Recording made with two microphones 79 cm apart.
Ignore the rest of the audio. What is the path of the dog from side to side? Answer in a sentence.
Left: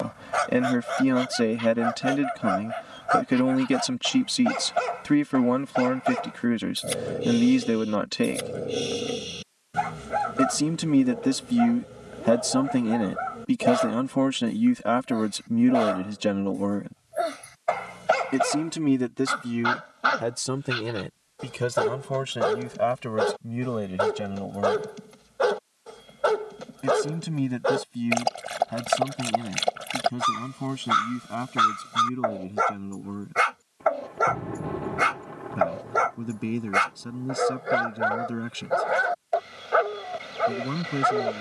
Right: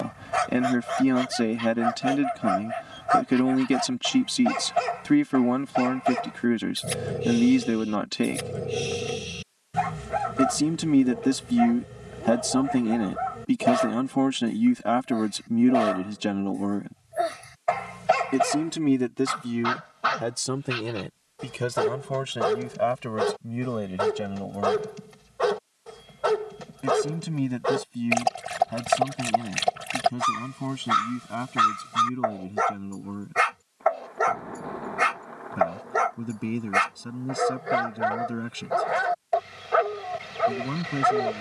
You can hear the dog stay put.